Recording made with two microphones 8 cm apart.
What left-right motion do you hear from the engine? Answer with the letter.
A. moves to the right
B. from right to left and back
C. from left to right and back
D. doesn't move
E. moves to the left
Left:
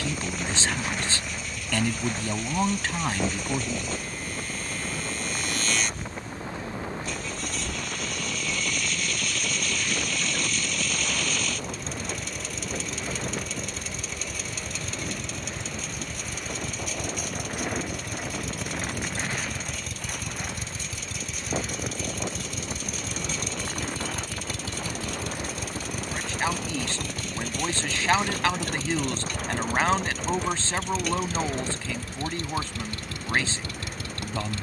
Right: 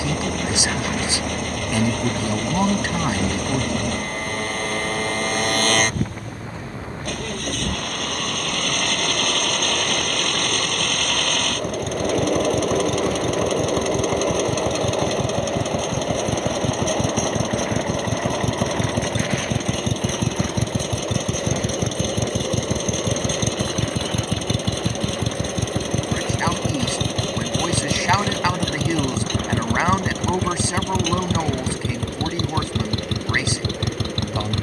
D.